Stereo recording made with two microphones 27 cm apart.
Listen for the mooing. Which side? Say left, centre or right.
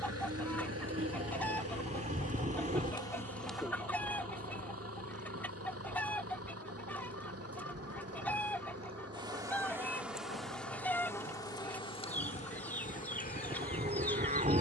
right.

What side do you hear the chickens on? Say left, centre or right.
centre.